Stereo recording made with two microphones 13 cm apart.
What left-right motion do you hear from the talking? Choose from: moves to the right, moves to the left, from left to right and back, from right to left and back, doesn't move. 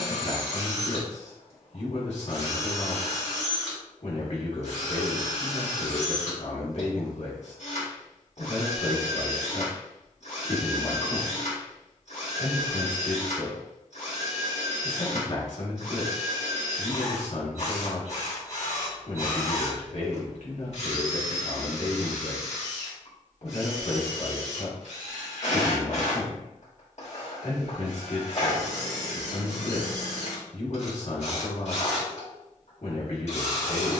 doesn't move.